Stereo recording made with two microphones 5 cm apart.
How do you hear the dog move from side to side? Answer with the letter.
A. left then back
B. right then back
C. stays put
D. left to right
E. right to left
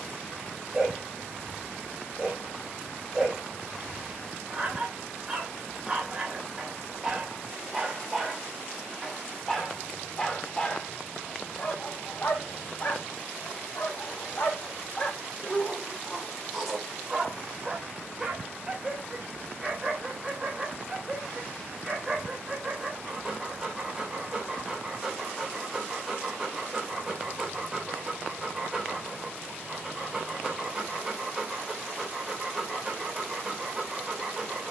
A.